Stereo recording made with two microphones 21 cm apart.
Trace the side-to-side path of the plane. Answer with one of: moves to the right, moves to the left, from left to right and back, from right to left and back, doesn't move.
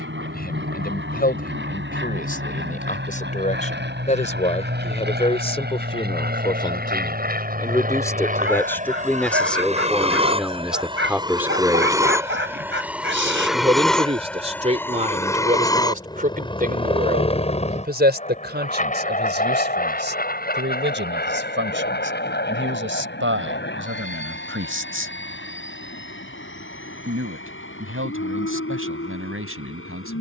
moves to the left.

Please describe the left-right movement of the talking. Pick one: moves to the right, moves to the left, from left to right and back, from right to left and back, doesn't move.
moves to the right.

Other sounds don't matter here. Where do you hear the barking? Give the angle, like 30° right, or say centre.
60° right.